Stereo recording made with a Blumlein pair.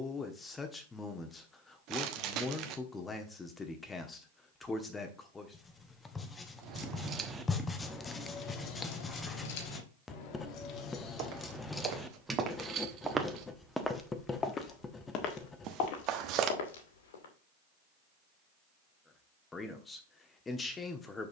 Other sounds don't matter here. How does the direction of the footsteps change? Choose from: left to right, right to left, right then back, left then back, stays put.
right to left.